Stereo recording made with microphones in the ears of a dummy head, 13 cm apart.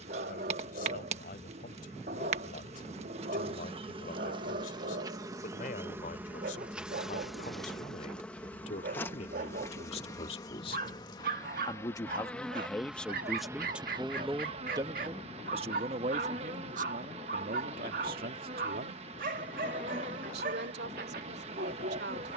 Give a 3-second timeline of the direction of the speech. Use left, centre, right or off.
left, left, left, left, centre, right, right, right.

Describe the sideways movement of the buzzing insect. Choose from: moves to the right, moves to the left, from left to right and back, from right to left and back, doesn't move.
from right to left and back.